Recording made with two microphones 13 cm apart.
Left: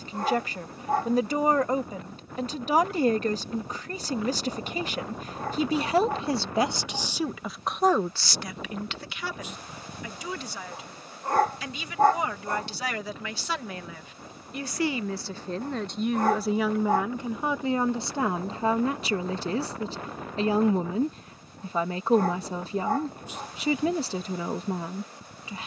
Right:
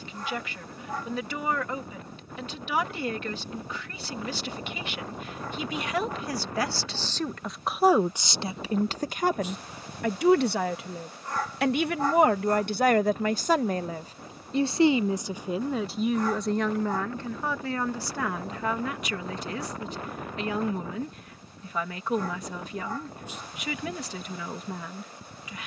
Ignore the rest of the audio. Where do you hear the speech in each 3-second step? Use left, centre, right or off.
left, left, centre, right, right, centre, left, left, left.